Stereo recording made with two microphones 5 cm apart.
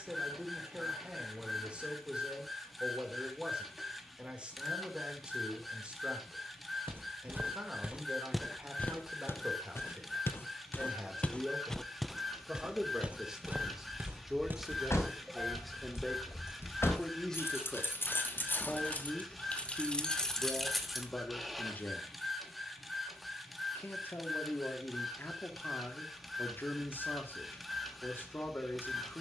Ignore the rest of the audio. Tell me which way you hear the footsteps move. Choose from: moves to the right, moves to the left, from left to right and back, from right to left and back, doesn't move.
from right to left and back.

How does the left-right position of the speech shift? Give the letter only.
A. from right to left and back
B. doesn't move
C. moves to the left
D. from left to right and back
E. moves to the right
C.